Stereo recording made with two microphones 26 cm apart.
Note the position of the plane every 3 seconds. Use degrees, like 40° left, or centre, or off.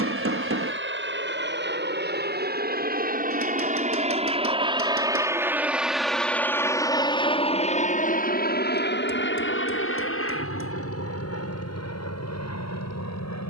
50° right, 20° right, 20° left, 50° left, 60° left.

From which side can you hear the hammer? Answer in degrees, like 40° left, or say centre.
60° right.